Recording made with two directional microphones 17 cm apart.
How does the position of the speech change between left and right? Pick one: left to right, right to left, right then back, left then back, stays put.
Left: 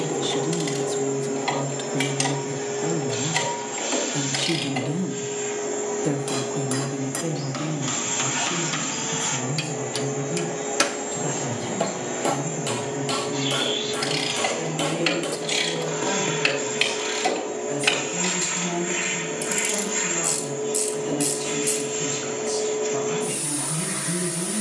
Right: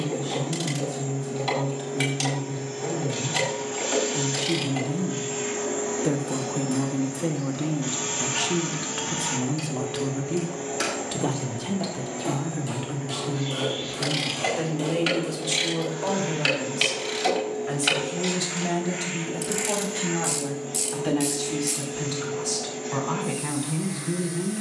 left to right.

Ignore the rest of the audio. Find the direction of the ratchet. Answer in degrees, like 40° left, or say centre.
20° left.